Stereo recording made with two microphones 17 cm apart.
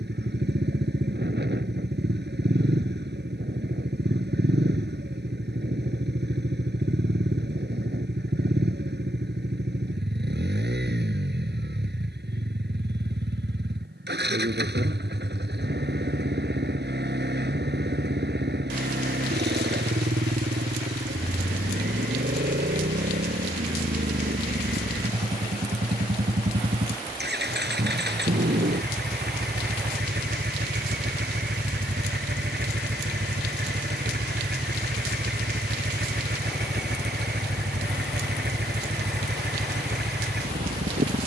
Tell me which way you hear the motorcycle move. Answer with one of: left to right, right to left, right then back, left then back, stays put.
stays put.